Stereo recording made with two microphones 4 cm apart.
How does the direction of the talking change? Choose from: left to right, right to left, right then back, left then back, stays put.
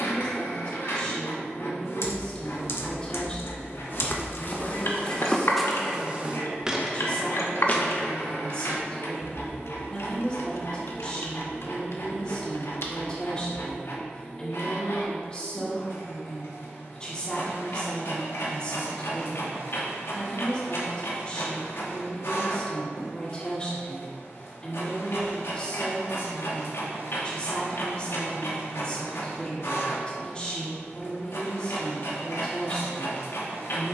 stays put.